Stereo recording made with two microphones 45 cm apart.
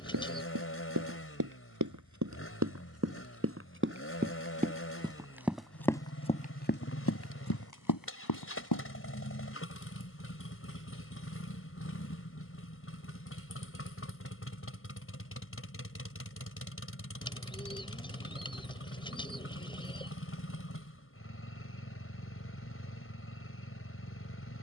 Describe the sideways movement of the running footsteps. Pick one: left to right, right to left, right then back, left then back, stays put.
right to left.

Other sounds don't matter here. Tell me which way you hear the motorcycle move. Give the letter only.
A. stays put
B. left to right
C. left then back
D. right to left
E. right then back
A.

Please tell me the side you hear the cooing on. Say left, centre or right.
centre.